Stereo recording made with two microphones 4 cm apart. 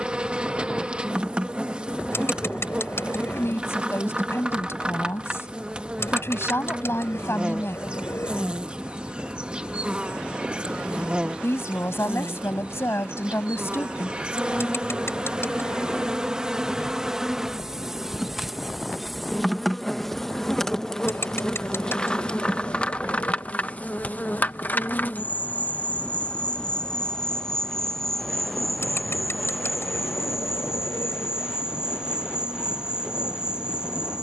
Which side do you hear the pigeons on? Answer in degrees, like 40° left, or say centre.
80° left.